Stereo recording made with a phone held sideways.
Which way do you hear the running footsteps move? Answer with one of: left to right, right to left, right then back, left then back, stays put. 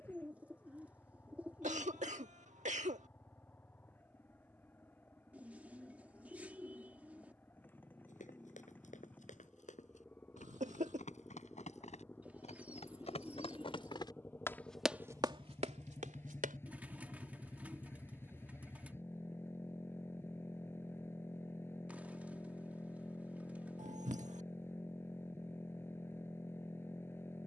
left to right.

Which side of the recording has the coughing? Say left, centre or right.
right.